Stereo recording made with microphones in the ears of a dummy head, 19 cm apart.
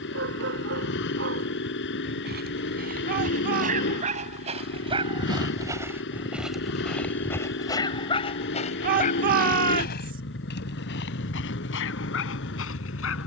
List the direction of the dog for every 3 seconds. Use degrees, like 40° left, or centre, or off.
50° right, 30° right, 10° left, 50° left, 70° left.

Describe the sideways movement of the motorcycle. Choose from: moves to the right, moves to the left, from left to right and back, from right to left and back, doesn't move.
doesn't move.